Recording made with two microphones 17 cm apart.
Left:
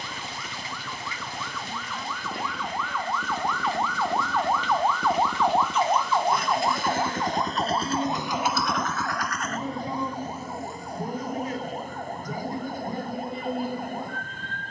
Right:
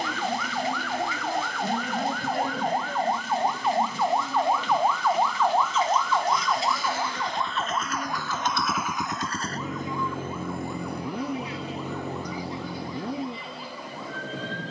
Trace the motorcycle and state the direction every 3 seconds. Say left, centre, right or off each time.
left, left, left, right, right.